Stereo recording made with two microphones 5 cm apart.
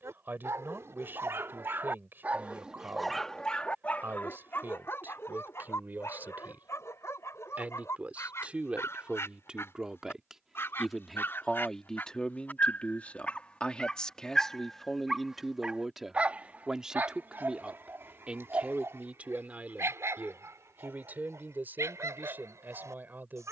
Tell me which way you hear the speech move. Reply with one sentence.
You can hear the speech move from right to left and back again.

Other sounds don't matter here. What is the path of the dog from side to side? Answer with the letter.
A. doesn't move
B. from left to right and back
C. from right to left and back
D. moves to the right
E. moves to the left
C.